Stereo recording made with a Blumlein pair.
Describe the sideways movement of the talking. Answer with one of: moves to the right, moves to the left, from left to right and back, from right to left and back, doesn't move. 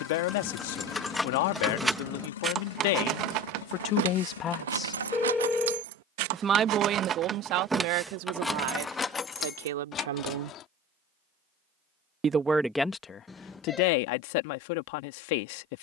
from left to right and back.